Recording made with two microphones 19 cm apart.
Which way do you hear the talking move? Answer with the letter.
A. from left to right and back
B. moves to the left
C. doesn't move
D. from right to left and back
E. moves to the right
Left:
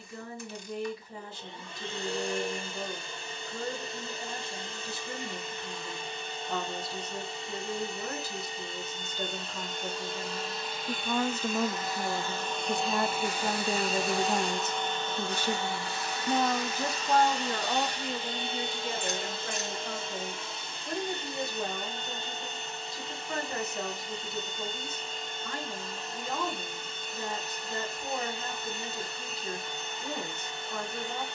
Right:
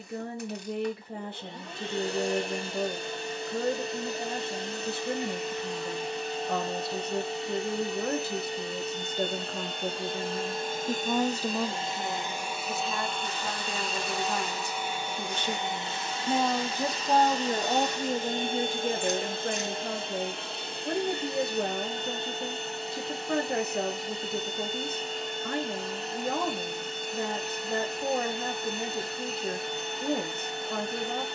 D.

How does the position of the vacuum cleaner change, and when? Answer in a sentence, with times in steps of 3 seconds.
In this clip you hear the vacuum cleaner on the right from 0 s, in the centre from 12 s and on the right from 15 s.